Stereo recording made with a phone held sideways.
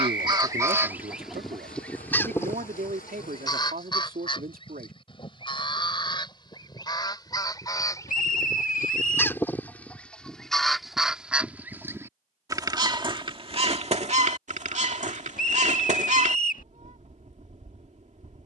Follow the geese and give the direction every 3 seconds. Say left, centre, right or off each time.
centre, left, left, centre, right, right.